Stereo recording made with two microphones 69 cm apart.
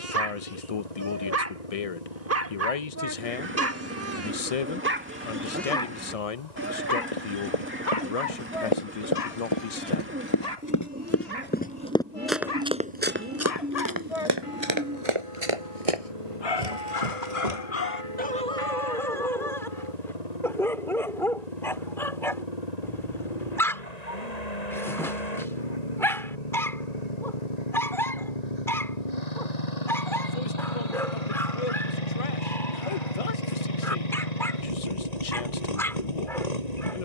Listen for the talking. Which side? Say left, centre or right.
left.